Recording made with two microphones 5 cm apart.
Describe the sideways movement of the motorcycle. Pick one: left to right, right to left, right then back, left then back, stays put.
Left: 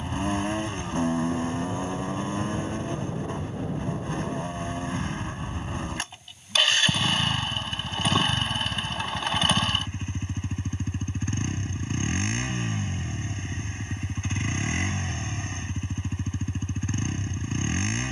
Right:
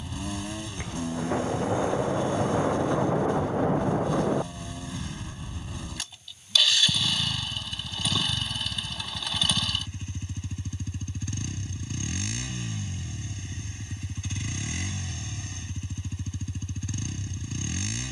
stays put.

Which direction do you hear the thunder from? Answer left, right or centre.
right.